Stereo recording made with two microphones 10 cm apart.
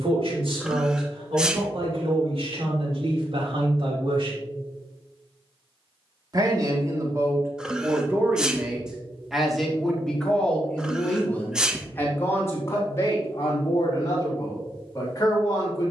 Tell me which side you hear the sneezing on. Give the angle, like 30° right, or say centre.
10° right.